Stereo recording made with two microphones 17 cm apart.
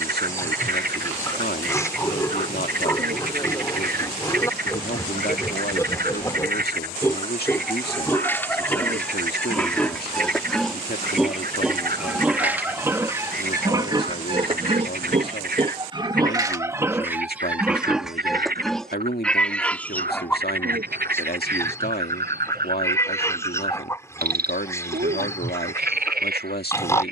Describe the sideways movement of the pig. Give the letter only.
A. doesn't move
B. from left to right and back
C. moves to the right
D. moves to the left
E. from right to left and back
B.